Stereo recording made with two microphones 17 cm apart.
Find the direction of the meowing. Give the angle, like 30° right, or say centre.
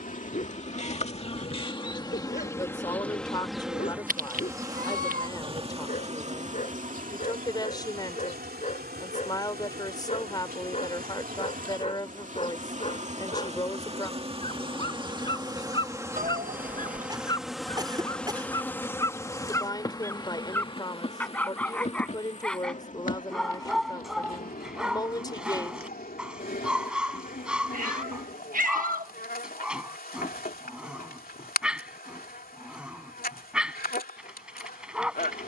50° right.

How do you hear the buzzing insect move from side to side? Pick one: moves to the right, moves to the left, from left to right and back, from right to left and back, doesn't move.
from left to right and back.